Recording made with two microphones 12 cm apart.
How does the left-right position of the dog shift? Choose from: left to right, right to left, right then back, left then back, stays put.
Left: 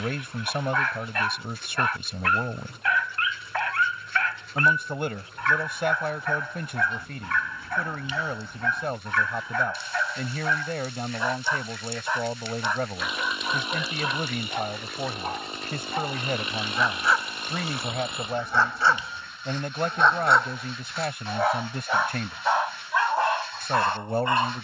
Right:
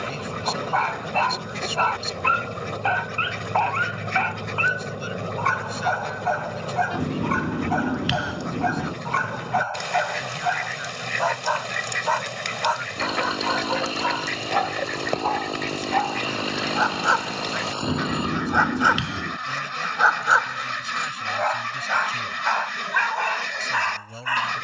right to left.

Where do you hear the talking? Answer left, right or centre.
left.